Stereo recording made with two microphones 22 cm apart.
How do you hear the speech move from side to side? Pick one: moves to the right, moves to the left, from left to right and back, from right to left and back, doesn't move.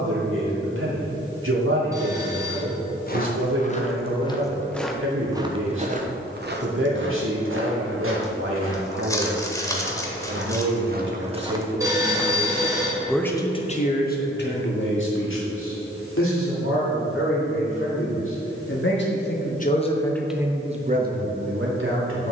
from right to left and back.